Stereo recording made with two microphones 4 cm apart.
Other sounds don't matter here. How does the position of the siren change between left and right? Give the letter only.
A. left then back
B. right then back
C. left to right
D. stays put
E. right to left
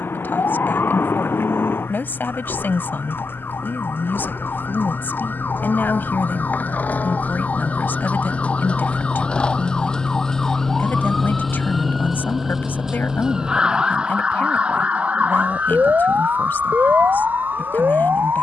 C.